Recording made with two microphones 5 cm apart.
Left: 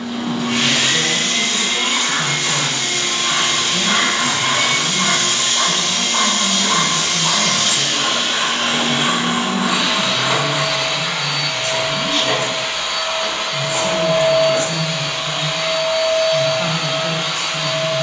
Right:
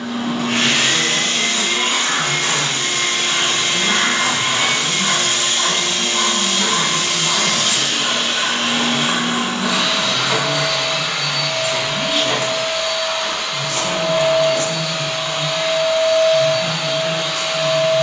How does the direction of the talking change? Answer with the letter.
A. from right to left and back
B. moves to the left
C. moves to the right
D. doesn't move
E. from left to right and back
E.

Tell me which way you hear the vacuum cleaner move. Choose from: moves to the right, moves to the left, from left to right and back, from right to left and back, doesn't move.
moves to the left.